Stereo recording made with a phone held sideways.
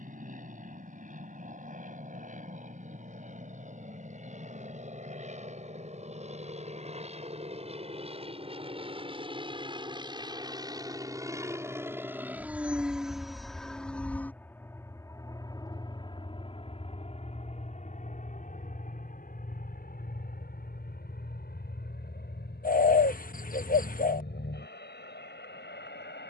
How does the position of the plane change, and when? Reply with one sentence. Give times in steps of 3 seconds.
You can hear the plane on the right from 0 s, in the centre from 12 s and on the left from 15 s.